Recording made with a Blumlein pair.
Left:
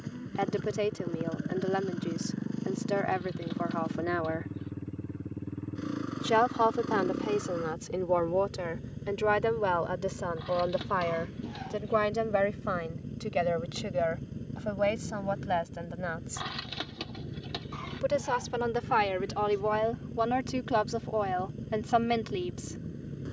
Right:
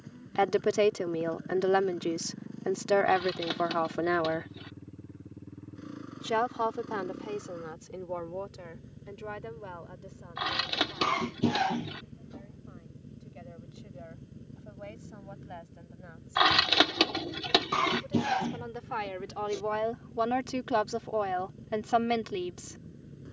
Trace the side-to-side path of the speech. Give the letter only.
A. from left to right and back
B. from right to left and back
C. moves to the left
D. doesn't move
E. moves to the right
B.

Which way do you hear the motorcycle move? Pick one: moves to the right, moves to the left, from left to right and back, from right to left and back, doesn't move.
doesn't move.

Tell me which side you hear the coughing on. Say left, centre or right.
right.